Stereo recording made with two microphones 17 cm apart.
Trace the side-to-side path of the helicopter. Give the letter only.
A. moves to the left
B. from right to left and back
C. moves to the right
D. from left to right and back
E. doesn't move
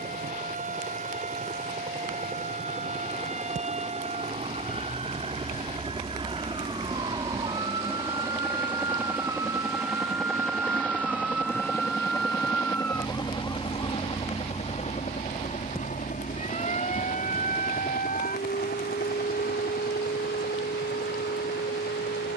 A.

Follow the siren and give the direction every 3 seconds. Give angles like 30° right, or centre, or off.
50° right, 40° right, 30° right, 10° right, 20° left, 40° left, 60° left, 70° left.